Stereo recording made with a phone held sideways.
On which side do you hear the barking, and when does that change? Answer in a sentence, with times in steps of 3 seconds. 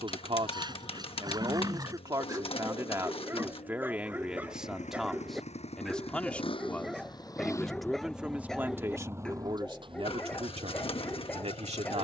You can hear the barking on the right from 0 s and in the centre from 3 s.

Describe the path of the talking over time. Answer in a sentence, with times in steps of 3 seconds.
In this clip you hear the talking on the right from 0 s, in the centre from 3 s and on the right from 9 s.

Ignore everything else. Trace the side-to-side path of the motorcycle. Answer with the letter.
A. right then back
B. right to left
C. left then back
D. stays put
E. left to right
E.